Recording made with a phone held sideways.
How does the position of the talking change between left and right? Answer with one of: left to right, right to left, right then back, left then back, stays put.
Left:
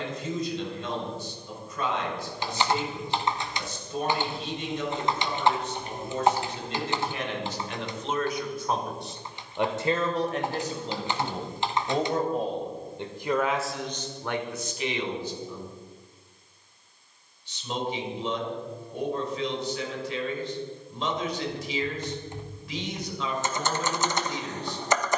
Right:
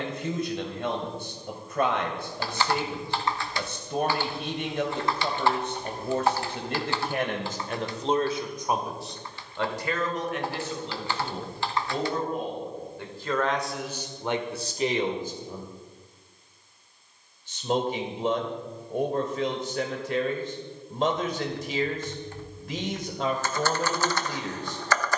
left then back.